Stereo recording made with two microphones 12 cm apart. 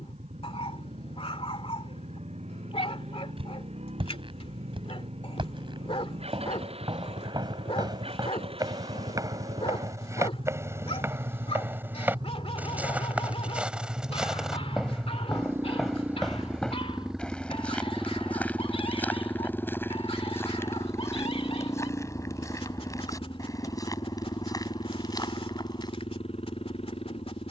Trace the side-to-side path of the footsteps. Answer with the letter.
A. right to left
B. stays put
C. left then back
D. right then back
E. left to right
A.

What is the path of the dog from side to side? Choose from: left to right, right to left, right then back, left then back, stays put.
stays put.